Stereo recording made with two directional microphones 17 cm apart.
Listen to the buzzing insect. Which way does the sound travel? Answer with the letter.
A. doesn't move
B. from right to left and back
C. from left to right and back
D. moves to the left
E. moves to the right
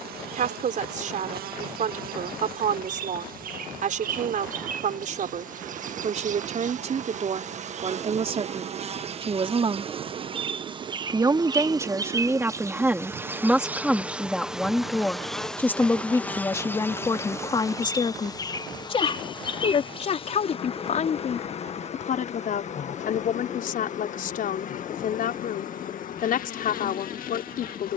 D.